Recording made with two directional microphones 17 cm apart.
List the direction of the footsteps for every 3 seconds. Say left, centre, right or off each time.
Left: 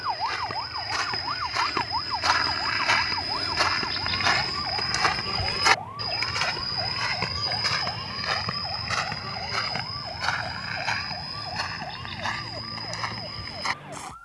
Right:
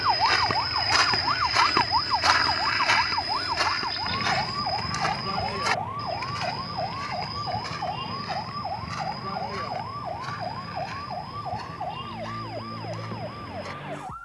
right, left, left, left, left.